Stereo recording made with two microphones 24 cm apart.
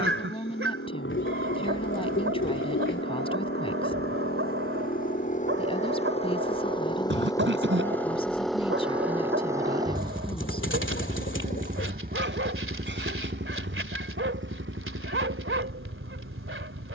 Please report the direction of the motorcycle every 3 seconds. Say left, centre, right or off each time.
left, left, centre, right, right, right.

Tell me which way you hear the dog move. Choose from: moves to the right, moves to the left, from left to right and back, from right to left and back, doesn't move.
doesn't move.